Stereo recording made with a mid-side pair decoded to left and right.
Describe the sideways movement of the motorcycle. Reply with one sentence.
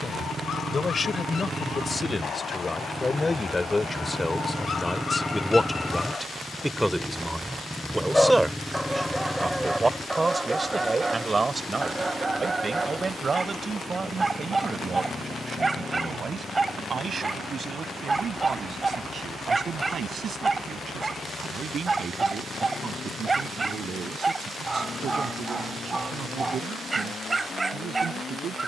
In this clip you hear the motorcycle move to the left.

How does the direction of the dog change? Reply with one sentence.
You can hear the dog travel towards the right.